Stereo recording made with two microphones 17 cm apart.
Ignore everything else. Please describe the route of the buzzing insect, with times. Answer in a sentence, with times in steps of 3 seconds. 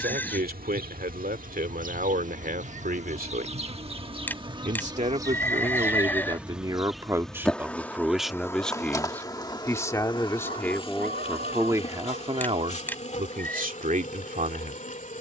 You can hear the buzzing insect on the right from 0 s, in the centre from 6 s and on the left from 9 s.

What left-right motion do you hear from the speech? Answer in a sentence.
In this clip you hear the speech go left and come back.